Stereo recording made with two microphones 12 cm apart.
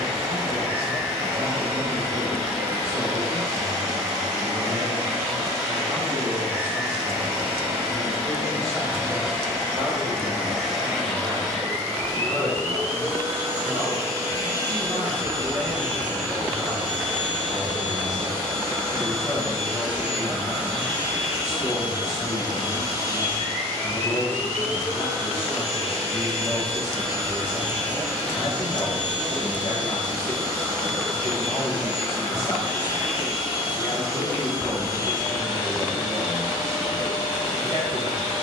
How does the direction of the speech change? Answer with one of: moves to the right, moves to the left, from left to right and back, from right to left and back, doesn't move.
moves to the left.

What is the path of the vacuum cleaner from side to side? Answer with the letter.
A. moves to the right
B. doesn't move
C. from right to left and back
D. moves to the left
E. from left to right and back
D.